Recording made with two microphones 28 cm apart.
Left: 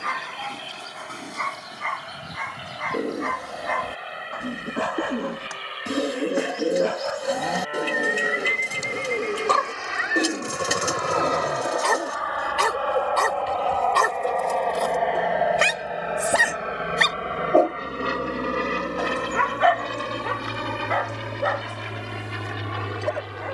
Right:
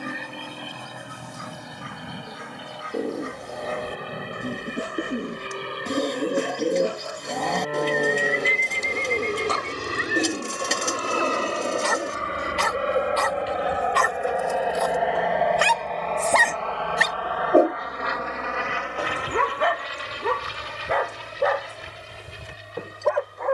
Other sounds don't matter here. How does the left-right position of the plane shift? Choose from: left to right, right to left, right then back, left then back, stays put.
right to left.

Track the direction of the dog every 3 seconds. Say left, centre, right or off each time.
left, left, left, left, left, centre, right, right.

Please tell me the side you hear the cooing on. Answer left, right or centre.
centre.